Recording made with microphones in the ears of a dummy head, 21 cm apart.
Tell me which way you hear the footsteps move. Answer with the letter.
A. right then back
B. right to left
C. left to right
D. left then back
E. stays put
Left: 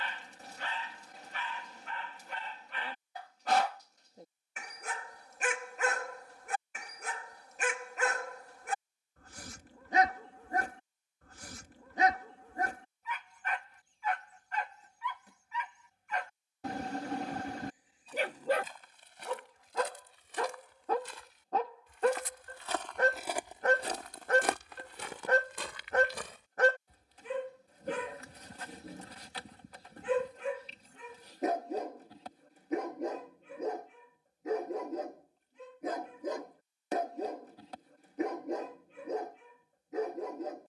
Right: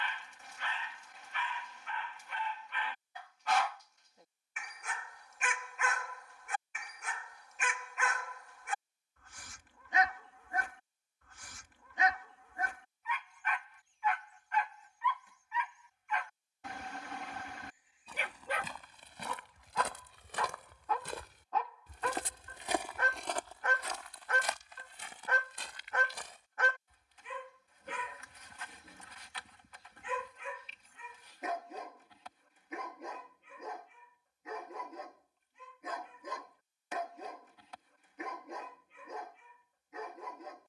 B.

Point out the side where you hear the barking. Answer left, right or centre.
left.